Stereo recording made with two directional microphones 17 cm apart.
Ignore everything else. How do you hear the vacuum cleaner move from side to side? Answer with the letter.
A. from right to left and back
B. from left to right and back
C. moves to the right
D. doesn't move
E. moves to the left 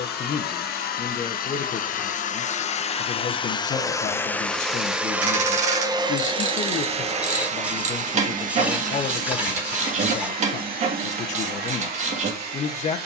C.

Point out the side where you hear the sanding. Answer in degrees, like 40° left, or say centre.
10° right.